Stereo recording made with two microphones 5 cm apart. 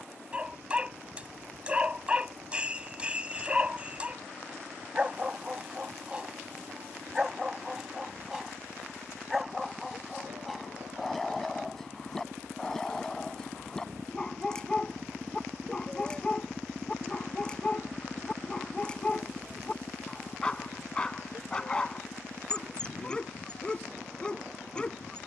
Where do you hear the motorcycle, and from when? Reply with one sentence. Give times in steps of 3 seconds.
In this clip you hear the motorcycle on the right from 0 s, in the centre from 15 s and on the left from 18 s.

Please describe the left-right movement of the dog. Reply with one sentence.
In this clip you hear the dog move from right to left.